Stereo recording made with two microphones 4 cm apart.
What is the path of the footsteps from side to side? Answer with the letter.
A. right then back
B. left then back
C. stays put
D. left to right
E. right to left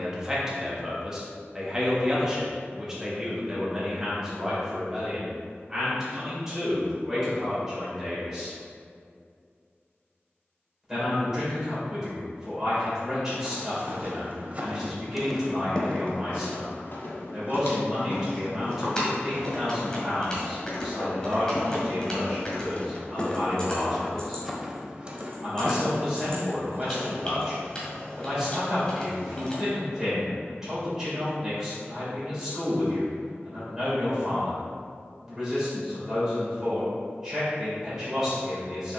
B.